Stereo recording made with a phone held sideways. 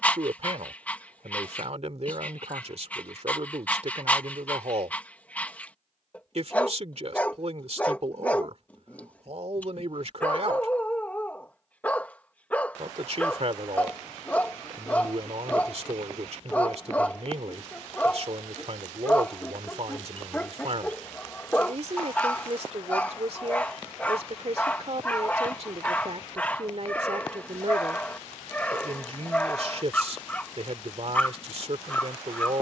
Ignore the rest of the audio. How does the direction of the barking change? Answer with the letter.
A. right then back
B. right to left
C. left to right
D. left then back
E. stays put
E.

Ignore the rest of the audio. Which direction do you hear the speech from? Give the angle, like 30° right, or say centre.
50° right.